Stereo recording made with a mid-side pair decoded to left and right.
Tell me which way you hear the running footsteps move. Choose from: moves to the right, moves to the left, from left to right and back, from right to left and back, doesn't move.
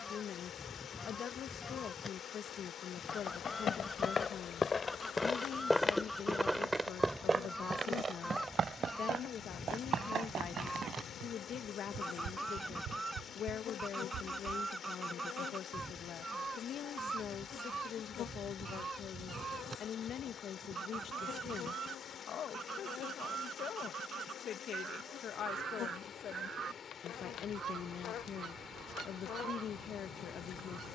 moves to the right.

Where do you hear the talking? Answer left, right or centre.
left.